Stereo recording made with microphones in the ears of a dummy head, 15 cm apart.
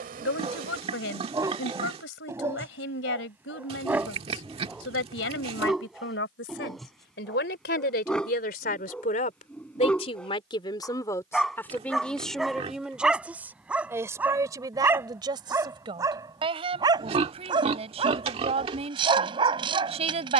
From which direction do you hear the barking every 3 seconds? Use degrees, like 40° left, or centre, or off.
20° right, 10° right, centre, centre, 10° right, 20° right, 30° right.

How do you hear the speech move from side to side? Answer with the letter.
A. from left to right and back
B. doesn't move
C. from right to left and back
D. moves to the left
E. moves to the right
E.